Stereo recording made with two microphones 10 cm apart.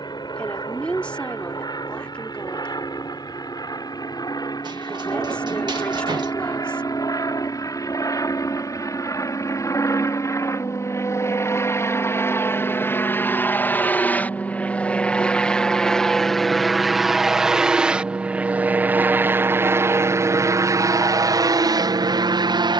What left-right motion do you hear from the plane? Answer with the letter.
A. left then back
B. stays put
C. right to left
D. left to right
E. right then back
D.